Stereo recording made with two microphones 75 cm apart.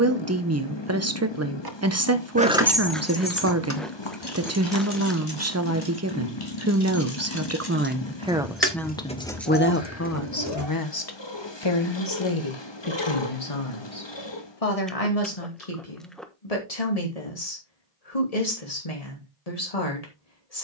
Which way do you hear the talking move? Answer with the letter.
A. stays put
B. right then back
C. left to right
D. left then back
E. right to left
E.